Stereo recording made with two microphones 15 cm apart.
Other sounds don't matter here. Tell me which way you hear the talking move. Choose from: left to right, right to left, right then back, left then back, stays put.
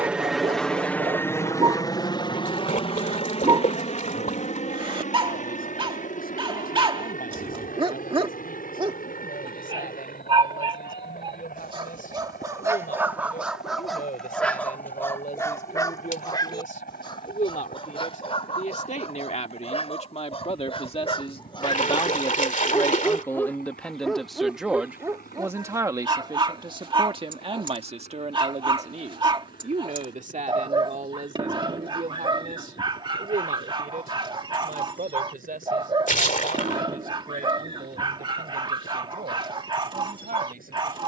left to right.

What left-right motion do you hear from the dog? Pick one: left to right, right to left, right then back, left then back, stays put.
left then back.